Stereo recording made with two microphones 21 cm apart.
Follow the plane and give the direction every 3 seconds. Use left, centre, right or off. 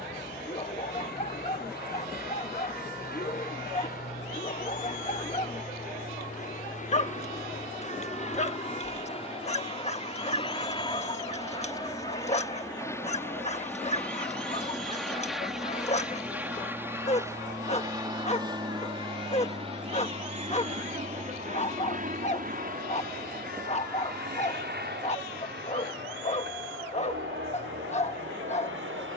left, left, left, left, centre, centre, right, right, right, right.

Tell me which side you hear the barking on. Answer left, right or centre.
left.